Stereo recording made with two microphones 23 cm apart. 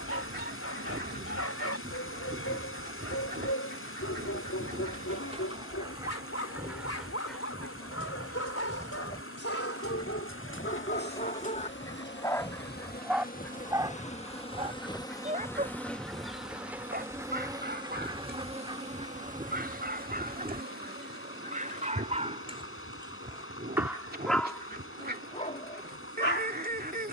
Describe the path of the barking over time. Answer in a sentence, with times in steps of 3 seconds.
You can hear the barking on the left from 0 s, in the centre from 12 s, on the right from 15 s and on the left from 24 s.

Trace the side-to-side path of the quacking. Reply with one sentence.
In this clip you hear the quacking move from right to left and back again.